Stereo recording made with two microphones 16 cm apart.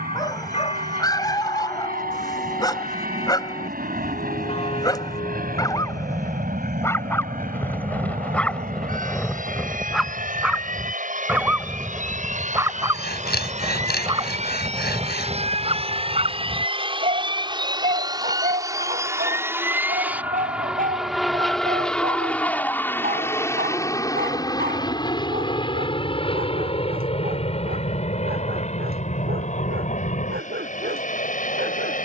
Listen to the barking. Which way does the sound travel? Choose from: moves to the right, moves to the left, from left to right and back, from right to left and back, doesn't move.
moves to the right.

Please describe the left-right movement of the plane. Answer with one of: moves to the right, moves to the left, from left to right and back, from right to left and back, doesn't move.
moves to the left.